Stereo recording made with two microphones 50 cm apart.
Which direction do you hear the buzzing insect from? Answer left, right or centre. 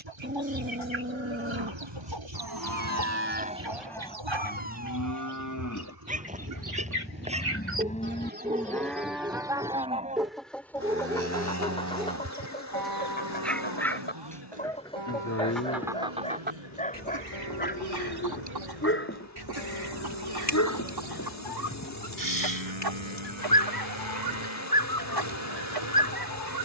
left.